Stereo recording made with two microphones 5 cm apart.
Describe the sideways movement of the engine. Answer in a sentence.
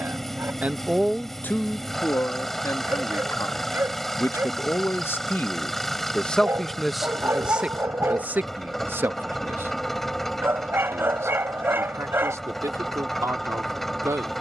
You can hear the engine stay in one place.